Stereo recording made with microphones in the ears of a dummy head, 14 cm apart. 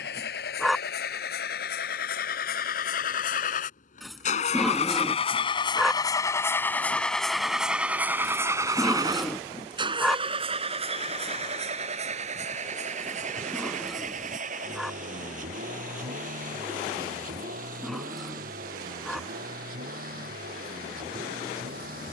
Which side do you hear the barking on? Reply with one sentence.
In this clip you hear the barking in the centre.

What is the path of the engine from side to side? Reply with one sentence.
You can hear the engine travel towards the right.